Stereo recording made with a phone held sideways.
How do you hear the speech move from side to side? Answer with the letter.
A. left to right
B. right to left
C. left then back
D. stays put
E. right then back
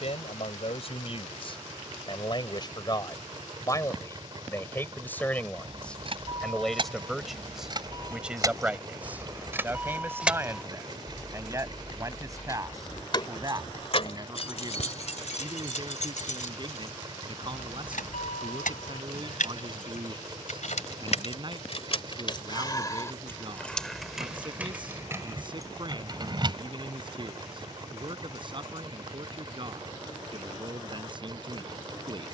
A.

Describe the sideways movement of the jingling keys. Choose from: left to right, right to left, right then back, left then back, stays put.
left then back.